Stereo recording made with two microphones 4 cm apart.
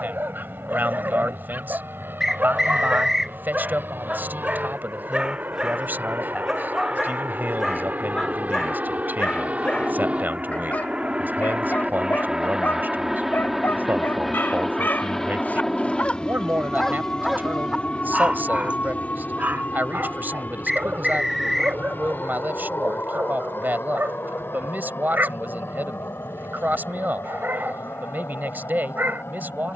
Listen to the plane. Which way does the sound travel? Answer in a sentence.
In this clip you hear the plane go from the right side to the left.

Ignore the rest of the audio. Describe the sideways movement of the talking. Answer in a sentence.
You can hear the talking stay in one place.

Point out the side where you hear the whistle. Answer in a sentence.
In this clip you hear the whistle in the centre.